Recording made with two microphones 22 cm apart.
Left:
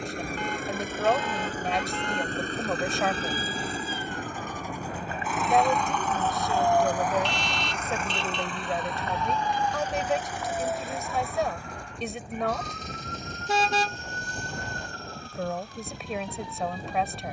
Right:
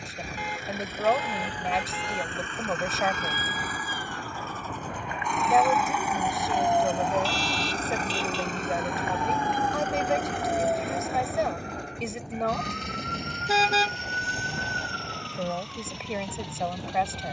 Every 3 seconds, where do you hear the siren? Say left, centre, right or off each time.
left, left, centre, right, right, right.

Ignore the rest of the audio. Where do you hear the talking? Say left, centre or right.
centre.